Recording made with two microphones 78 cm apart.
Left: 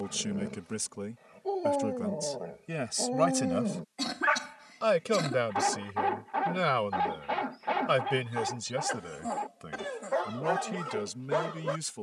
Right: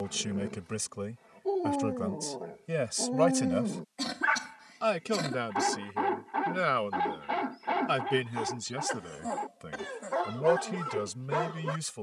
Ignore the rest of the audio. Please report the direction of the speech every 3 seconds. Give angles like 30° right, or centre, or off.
20° right, 10° left, 20° left, 10° right.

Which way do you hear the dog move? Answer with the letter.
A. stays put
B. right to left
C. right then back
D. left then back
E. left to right
A.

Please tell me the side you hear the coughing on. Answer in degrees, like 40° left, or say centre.
centre.